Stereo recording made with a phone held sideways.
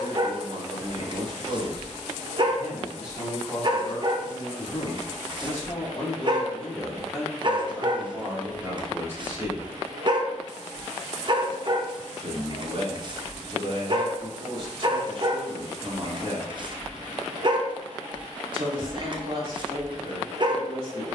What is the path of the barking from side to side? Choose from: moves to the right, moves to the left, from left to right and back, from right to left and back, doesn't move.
doesn't move.